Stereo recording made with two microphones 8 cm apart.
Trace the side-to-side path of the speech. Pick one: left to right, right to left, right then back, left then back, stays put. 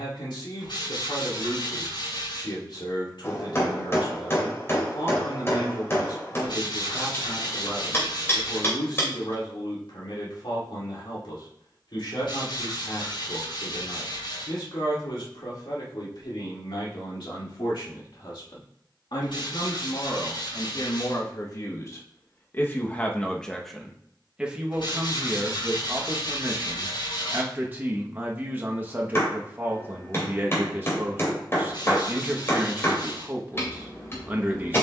left to right.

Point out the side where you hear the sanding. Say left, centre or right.
left.